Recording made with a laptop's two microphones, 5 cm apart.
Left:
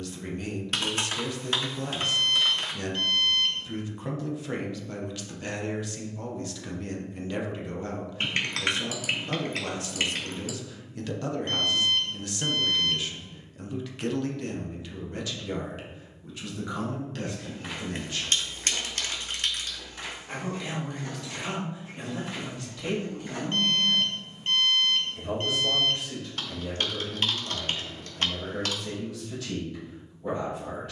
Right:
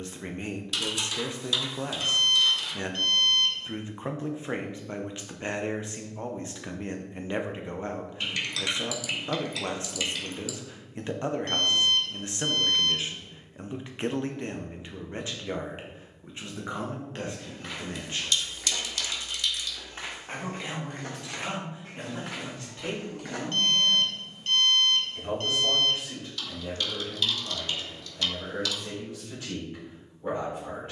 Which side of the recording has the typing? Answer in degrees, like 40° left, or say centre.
40° left.